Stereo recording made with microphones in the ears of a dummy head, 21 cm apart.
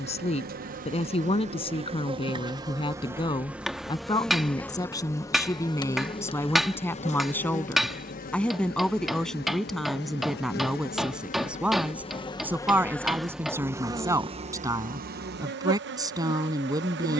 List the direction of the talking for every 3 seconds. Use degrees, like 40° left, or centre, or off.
30° left, 20° left, 10° left, centre, 10° right, 20° right.